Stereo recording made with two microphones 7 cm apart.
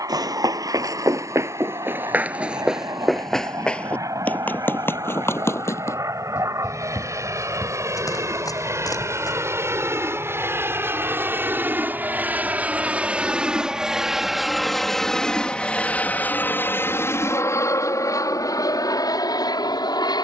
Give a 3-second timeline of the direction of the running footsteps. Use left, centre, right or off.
right, left, left, left, off, off, off.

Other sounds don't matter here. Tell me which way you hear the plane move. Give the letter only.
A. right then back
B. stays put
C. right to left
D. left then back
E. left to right
C.